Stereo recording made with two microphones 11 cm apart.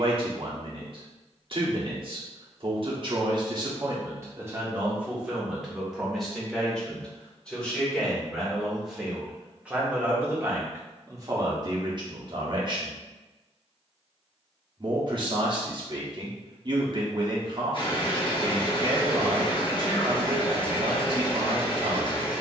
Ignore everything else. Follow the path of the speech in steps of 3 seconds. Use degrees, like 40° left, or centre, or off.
50° right, 20° right, centre, 20° right, 40° right, 40° right, 40° right, 40° right.